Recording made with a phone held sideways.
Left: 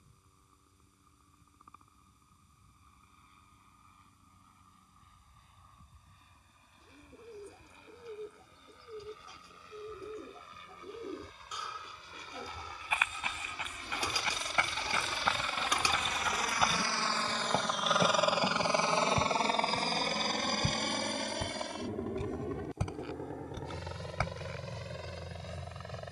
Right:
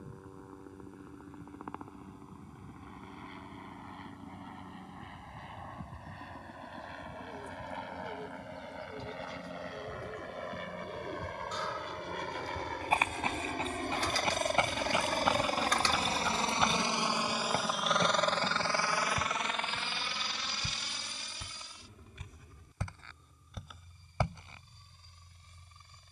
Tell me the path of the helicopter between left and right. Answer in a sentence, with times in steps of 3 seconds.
In this clip you hear the helicopter on the right from 0 s and on the left from 18 s.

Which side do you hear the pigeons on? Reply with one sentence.
You can hear the pigeons in the centre.